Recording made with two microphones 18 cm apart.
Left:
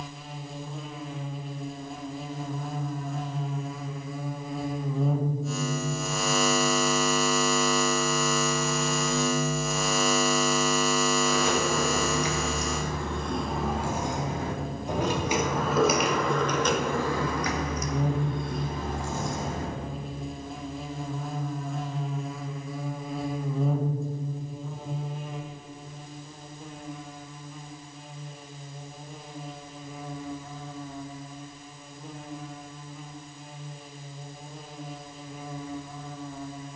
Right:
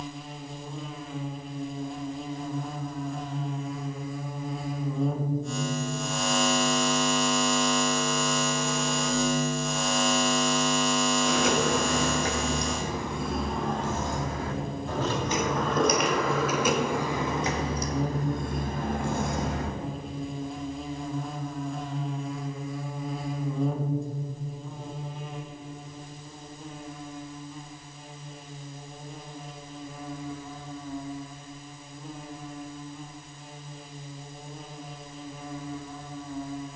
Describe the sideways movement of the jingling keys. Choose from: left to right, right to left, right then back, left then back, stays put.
left then back.